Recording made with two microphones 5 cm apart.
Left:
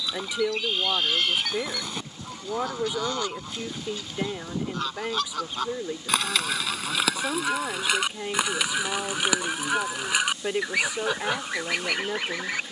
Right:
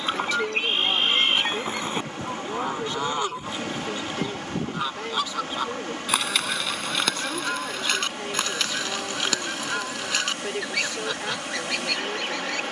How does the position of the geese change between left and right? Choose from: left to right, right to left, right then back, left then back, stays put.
right to left.